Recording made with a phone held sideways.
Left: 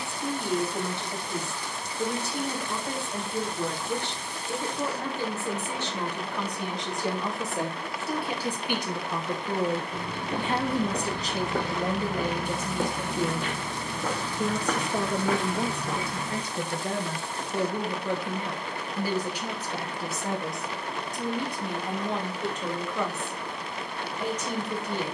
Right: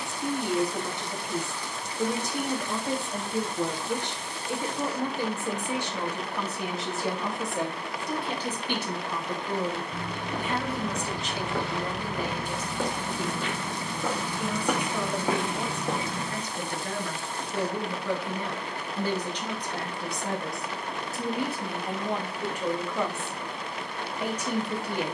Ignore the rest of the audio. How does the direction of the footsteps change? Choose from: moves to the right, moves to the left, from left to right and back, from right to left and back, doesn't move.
moves to the right.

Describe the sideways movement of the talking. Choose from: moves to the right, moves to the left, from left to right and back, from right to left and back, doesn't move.
from right to left and back.